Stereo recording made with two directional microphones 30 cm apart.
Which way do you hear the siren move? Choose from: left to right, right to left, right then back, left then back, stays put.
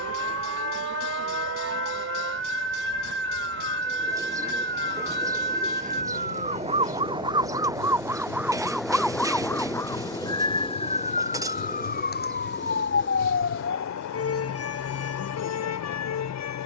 right to left.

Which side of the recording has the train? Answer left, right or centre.
left.